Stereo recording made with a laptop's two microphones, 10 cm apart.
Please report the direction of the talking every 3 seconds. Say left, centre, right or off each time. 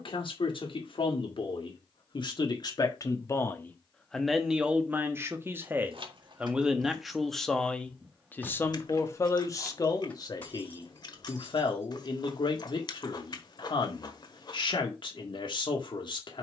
left, centre, centre, left, left, left.